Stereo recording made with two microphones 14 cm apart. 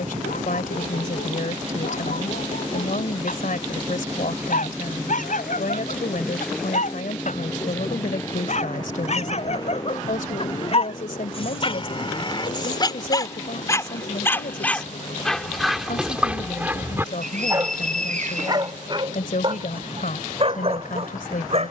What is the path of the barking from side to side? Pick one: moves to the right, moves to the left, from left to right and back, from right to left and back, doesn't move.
moves to the right.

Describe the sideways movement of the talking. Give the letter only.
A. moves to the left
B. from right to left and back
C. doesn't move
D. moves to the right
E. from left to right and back
C.